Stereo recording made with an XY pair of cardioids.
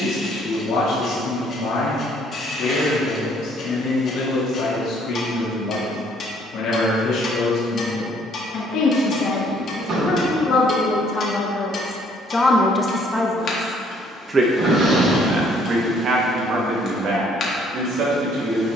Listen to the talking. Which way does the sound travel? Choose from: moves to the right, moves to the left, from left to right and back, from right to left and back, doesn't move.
moves to the right.